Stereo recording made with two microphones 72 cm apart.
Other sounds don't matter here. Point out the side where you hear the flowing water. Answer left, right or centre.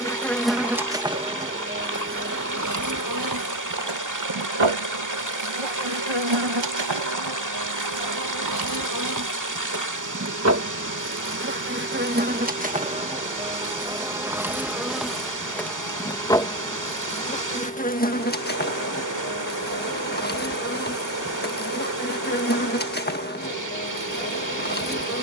right.